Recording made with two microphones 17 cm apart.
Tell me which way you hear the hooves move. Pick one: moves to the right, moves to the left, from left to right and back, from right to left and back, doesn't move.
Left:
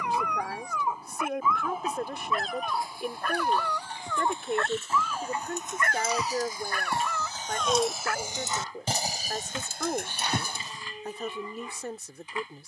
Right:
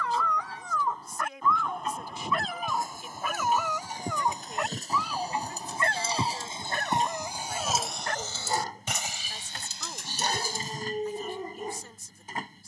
moves to the left.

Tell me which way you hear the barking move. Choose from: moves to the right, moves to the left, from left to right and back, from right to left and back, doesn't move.
moves to the right.